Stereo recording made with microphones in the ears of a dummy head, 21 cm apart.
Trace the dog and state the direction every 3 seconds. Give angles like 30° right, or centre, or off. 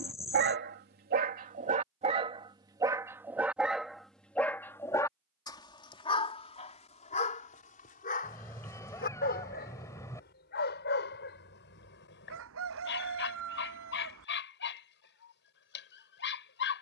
30° right, 10° left, 30° left, 40° left, 50° left, 50° left.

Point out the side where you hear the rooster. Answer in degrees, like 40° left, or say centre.
60° right.